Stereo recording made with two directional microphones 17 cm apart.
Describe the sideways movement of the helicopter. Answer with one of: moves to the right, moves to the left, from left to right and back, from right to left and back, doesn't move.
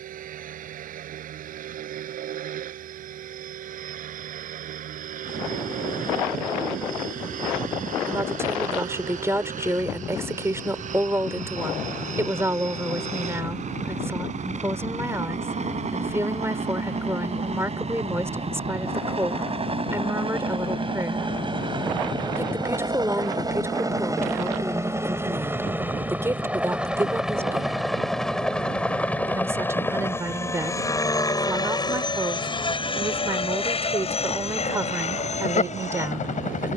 moves to the left.